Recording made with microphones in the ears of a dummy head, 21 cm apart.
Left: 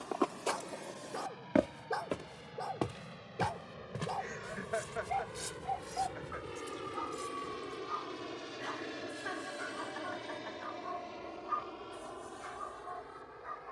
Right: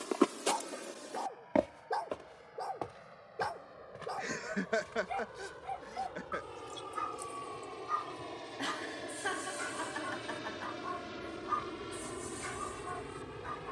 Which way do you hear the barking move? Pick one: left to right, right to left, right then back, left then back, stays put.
left to right.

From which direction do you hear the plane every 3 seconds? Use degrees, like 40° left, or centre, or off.
60° left, 50° left, 20° left, 10° right, 40° right.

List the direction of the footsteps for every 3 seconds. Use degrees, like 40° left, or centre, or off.
centre, 70° left, 80° left, off, off.